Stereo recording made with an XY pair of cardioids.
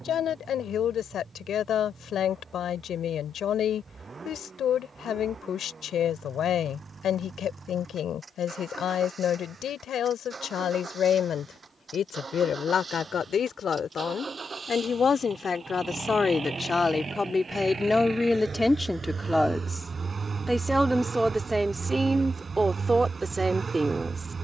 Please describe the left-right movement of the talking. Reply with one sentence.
You can hear the talking go from the left side to the right.